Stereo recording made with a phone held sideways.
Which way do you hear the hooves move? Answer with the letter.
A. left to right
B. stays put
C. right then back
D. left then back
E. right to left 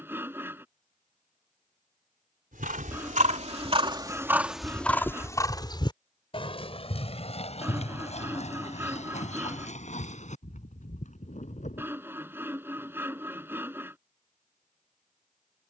E.